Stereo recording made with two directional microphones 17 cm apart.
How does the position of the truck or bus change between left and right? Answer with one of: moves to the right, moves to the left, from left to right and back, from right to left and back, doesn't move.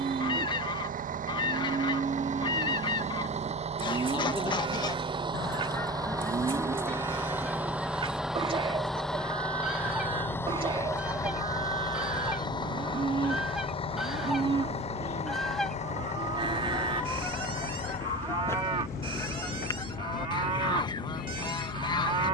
moves to the left.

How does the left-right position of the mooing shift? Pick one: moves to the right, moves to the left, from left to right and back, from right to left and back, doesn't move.
doesn't move.